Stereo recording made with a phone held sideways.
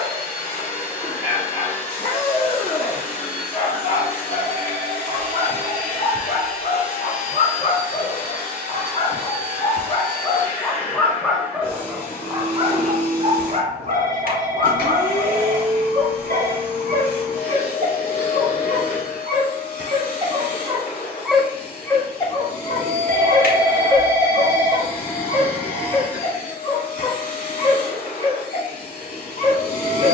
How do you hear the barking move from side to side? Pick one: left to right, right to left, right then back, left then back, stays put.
right then back.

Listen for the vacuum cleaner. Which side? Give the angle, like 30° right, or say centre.
60° left.